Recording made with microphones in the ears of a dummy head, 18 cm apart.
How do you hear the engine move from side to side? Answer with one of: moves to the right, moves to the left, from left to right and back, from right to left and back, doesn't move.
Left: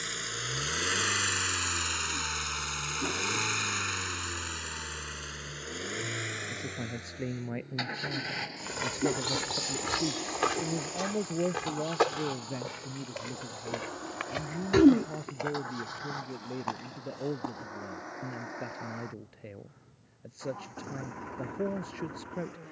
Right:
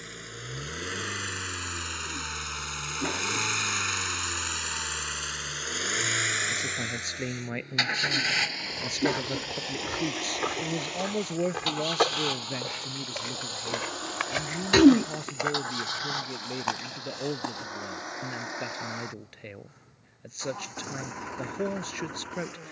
moves to the right.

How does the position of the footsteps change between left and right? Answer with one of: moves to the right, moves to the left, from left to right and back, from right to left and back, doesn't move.
moves to the right.